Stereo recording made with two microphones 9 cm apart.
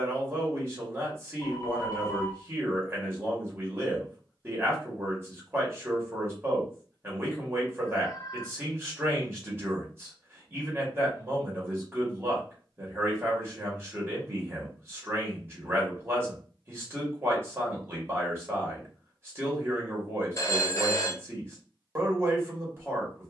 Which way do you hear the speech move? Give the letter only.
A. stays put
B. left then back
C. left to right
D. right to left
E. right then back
A.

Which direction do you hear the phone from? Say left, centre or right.
left.